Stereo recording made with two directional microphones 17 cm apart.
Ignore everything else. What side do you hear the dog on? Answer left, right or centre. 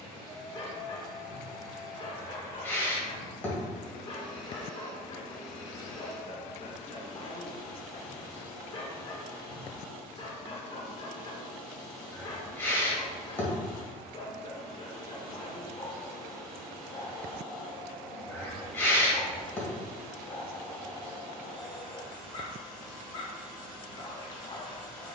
left.